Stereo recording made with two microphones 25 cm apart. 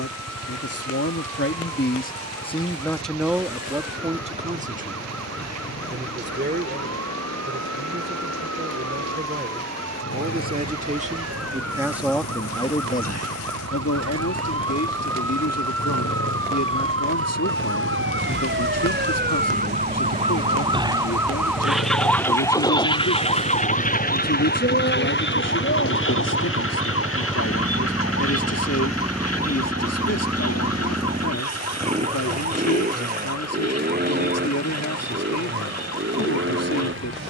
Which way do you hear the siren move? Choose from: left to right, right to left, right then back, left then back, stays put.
right to left.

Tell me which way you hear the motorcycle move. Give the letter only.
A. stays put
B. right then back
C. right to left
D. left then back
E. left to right
E.